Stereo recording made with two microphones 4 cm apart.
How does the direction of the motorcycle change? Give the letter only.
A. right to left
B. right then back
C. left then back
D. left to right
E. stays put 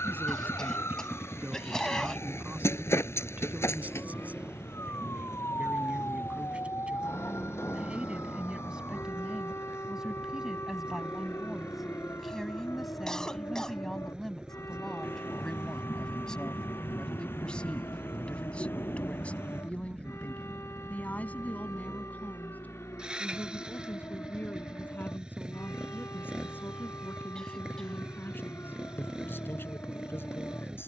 E.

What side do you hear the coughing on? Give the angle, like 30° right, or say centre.
10° left.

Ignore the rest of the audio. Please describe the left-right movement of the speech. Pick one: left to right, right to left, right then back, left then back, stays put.
right to left.